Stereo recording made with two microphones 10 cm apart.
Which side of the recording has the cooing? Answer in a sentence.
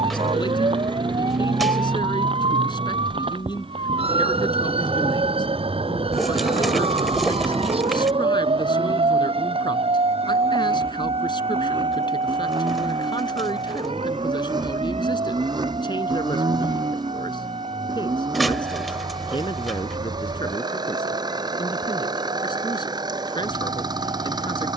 You can hear the cooing in the centre.